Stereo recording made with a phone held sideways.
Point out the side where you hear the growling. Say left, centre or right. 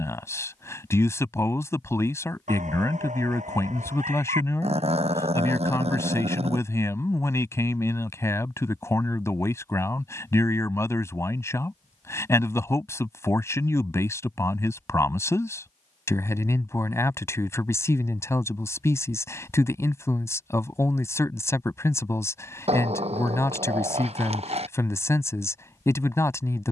right.